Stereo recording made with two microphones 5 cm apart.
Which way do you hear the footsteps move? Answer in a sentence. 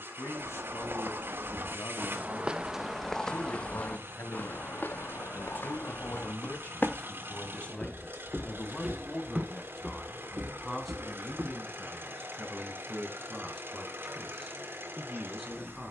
In this clip you hear the footsteps move from right to left and back again.